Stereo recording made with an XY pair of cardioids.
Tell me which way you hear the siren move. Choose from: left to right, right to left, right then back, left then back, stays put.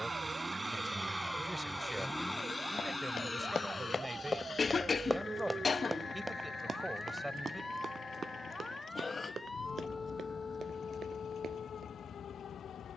right to left.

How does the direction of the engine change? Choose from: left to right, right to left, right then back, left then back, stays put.
right to left.